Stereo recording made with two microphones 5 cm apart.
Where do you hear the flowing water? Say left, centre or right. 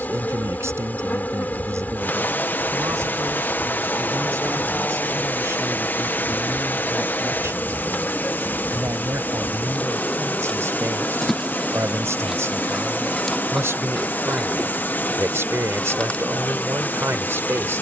left.